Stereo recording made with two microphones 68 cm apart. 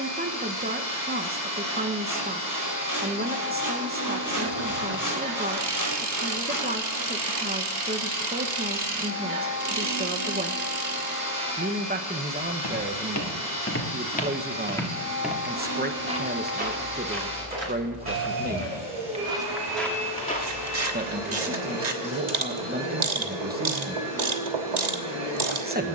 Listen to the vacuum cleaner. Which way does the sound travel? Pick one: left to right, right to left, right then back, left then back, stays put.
stays put.